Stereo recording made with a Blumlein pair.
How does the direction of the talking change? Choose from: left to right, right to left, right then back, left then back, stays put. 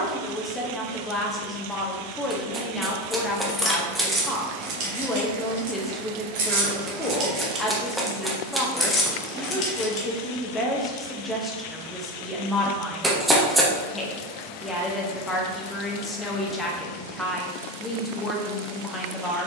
stays put.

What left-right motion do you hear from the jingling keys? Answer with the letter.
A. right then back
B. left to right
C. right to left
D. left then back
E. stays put
A.